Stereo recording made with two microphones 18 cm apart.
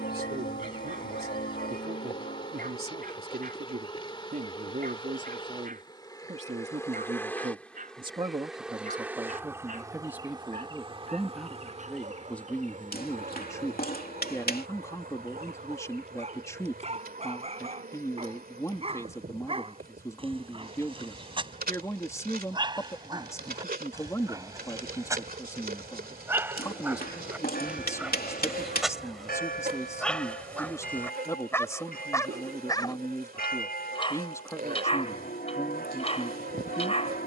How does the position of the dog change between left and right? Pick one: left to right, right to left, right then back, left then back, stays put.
right to left.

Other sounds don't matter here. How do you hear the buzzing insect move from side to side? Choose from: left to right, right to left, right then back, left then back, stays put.
left to right.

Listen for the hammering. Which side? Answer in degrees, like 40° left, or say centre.
60° left.